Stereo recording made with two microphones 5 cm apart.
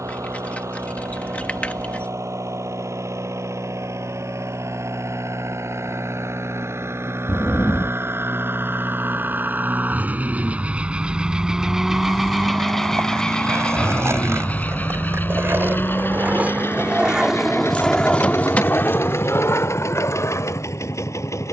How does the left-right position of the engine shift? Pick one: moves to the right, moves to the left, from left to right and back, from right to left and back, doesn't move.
moves to the left.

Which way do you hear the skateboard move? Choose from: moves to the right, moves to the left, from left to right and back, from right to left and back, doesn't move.
moves to the left.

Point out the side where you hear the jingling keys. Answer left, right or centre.
left.